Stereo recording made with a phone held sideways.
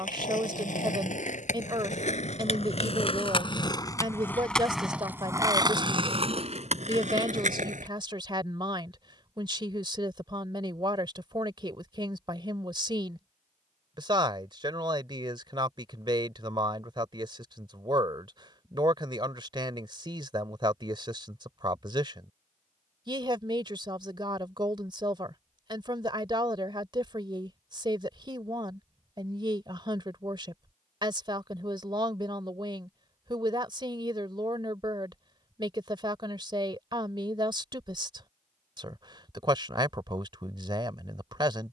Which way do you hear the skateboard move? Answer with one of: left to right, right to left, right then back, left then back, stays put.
left to right.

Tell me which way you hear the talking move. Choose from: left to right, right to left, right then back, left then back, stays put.
stays put.